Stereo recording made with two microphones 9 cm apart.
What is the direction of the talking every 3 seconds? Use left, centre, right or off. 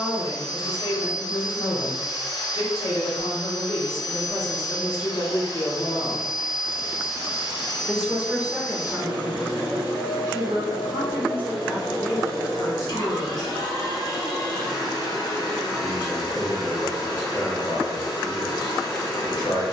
left, left, centre, right, left, left, left.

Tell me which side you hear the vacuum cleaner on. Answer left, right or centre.
left.